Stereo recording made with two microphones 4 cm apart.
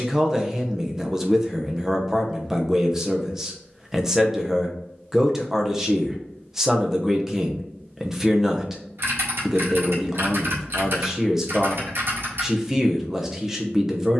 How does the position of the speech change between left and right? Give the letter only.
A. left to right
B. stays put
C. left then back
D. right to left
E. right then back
B.